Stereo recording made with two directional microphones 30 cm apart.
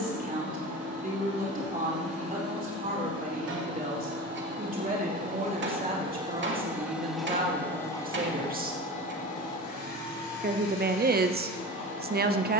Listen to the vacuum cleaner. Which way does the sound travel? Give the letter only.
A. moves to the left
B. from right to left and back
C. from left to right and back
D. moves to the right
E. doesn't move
A.